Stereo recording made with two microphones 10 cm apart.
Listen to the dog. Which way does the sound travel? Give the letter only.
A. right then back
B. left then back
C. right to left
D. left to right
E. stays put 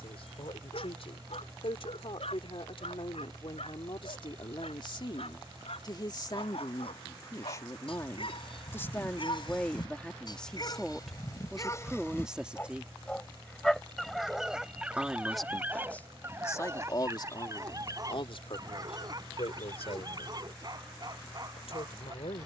D.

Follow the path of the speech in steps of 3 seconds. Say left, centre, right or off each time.
left, left, left, centre, centre, left, left, left.